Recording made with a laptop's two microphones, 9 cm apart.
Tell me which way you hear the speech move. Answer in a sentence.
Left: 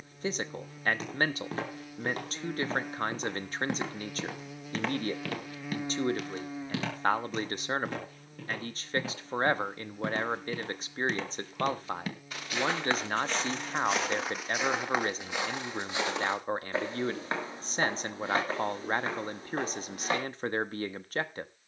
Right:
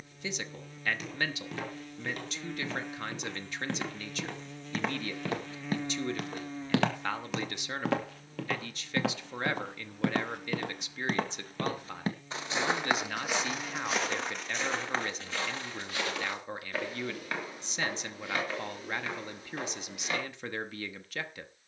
In this clip you hear the speech stay in one place.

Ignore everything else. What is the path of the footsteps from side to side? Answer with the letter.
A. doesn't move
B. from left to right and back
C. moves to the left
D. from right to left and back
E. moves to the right
B.